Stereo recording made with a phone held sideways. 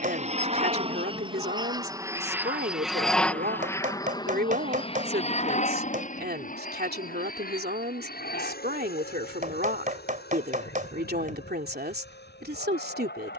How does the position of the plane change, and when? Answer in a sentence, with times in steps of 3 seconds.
You can hear the plane on the right from 0 s and on the left from 3 s.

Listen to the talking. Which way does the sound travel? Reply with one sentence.
In this clip you hear the talking stay in one place.